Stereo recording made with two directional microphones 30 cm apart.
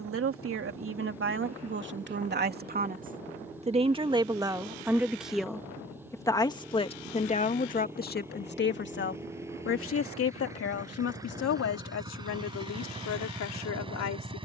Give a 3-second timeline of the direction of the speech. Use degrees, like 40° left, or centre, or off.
40° right, 10° right, 20° left, 50° left, 60° left.